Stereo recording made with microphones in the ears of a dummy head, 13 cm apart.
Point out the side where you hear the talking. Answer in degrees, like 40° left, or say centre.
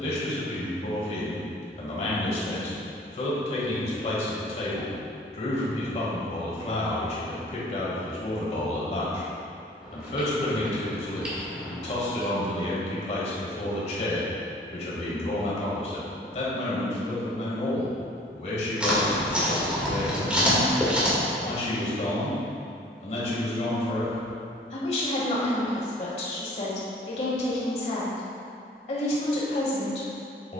50° left.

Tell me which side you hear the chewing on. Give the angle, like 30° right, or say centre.
10° right.